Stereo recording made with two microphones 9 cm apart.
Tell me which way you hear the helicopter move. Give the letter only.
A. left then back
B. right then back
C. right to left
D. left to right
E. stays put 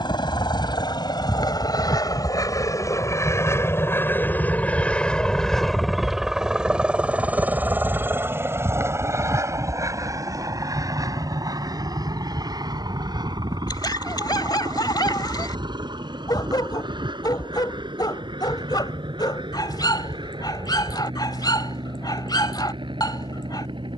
D.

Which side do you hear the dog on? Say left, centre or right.
left.